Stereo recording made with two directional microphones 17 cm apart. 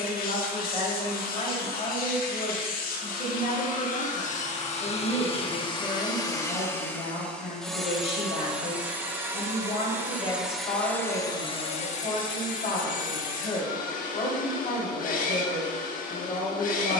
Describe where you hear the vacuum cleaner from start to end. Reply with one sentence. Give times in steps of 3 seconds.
You can hear the vacuum cleaner on the left from 0 s, in the centre from 6 s and on the left from 12 s.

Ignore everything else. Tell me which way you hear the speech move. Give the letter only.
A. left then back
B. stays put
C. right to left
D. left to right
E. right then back
B.